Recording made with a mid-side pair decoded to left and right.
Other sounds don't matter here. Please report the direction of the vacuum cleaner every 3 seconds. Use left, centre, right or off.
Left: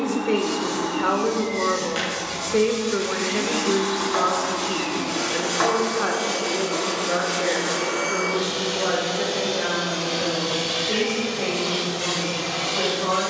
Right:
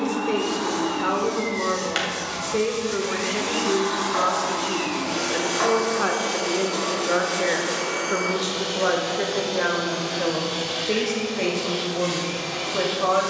right, right, centre, left, left.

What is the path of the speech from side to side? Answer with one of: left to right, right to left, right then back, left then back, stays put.
left to right.